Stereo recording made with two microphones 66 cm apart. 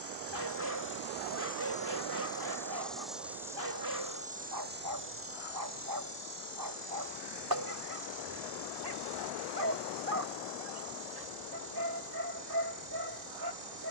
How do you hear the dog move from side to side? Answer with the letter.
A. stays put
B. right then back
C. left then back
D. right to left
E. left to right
A.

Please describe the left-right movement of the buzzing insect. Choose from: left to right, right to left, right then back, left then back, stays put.
left to right.